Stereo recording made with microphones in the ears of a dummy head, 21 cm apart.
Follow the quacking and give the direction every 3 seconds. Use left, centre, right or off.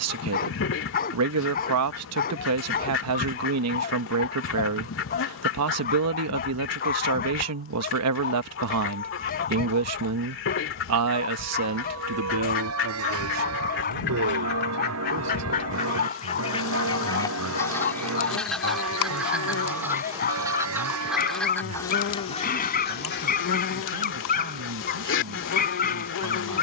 left, left, left, left, left, left, centre, left, left.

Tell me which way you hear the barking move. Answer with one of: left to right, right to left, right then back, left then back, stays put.
stays put.